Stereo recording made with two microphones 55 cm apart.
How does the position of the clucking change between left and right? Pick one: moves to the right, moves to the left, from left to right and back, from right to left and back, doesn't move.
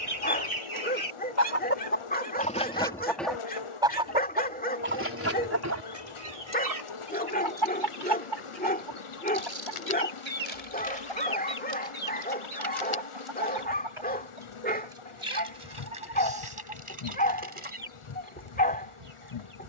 moves to the right.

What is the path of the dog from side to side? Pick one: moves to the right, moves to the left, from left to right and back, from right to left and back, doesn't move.
doesn't move.